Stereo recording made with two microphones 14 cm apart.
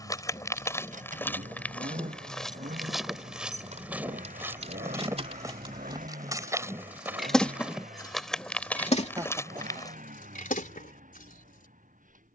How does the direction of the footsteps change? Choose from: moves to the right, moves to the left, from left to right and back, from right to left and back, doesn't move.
from left to right and back.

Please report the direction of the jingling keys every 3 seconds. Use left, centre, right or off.
right, right, centre, left.